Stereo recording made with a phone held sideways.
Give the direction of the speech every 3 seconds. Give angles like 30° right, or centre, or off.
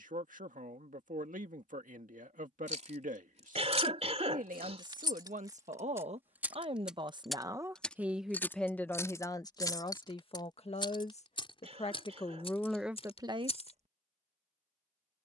70° right, 60° right, 20° right, 40° left, 10° right.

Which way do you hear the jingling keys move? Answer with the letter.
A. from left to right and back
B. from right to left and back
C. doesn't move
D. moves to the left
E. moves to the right
D.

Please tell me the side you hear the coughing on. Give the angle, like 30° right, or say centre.
50° right.